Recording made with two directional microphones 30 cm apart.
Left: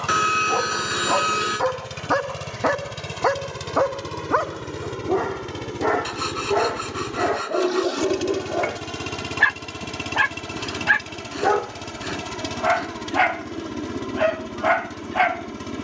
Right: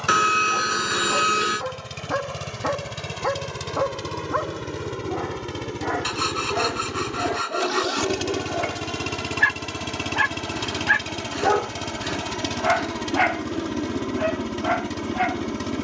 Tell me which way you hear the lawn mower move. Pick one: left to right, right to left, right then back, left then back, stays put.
left to right.